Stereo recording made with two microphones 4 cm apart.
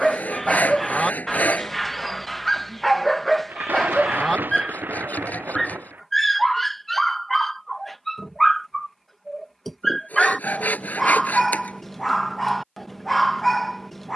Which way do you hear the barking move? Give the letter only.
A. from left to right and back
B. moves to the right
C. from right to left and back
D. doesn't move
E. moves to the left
D.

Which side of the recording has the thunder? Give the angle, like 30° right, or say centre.
50° right.